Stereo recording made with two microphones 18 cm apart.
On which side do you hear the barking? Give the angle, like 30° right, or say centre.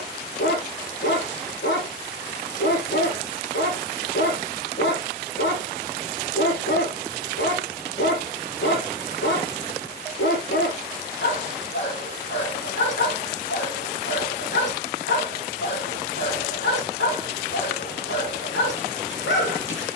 90° left.